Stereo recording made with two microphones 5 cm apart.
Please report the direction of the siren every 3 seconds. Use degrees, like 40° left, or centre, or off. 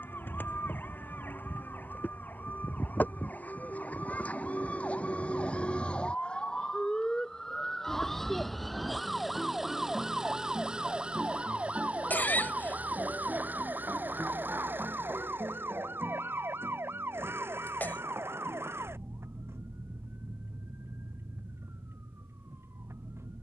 50° left, 30° left, 10° left, 20° right, 40° right, 60° right, 70° right, 70° right.